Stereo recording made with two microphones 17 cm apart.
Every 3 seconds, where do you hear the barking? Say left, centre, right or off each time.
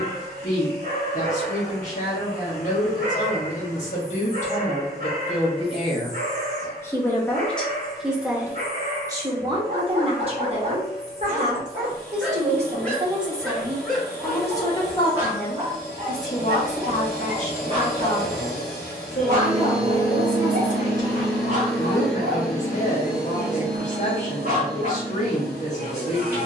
right, right, right, right, centre, right, right, right, right.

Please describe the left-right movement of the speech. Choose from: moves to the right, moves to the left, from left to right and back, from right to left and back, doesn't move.
from left to right and back.